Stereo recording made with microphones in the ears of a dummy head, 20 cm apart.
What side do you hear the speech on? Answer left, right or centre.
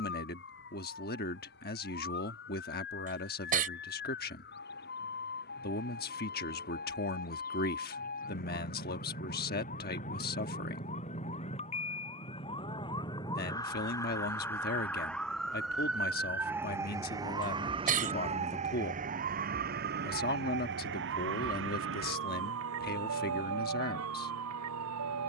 left.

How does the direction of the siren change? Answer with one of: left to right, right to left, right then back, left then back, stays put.
left to right.